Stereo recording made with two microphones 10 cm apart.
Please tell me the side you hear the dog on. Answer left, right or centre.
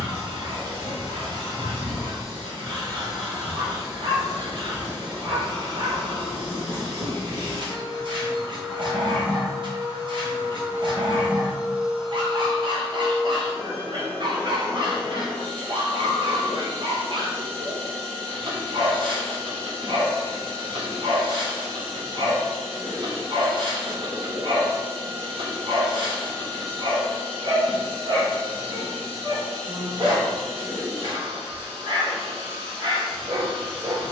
right.